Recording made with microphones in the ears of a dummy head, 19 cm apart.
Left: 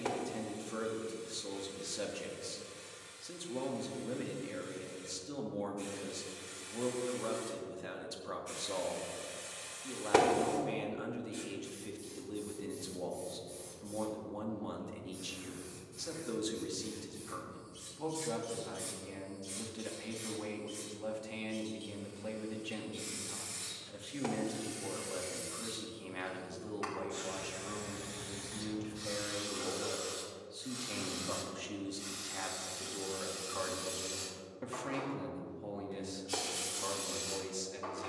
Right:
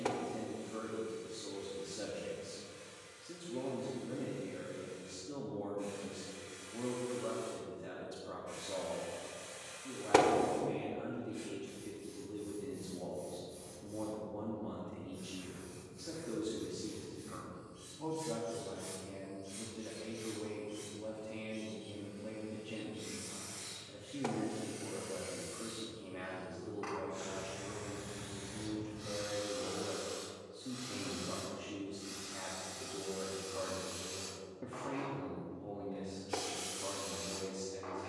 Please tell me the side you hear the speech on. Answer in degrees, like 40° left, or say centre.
60° left.